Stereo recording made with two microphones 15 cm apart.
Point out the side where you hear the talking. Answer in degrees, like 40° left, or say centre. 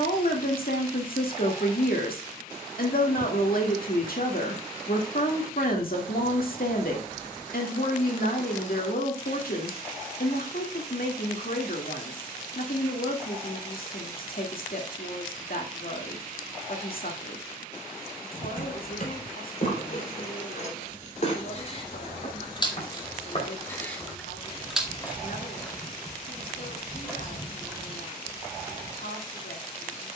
70° left.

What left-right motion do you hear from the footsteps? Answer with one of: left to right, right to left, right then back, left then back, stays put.
left to right.